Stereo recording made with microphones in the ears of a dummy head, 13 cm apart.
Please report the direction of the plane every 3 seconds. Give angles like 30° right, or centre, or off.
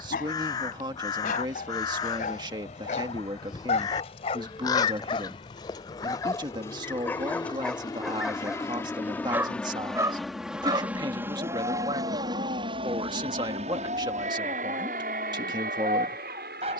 50° left, 40° left, 30° left, centre, 40° right, 60° right.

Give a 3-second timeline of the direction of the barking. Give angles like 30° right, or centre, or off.
60° left, 40° left, 10° left, 20° right, 40° right, 40° right.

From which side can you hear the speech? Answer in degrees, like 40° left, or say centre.
30° right.